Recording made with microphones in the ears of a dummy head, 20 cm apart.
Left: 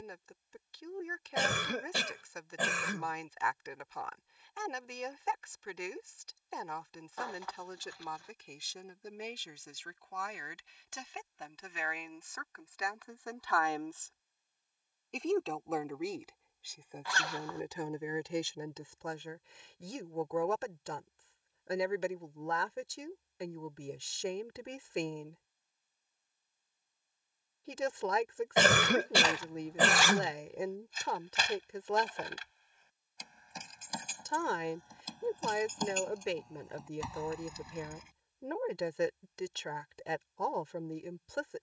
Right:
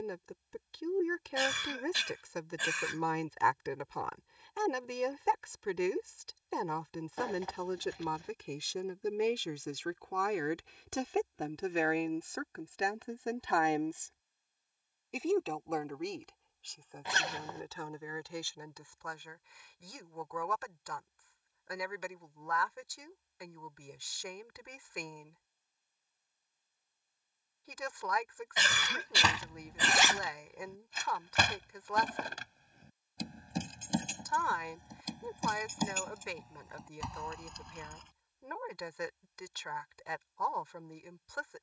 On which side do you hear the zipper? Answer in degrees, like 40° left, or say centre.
20° right.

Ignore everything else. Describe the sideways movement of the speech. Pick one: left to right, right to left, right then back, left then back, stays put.
right to left.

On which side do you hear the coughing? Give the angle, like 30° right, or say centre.
50° left.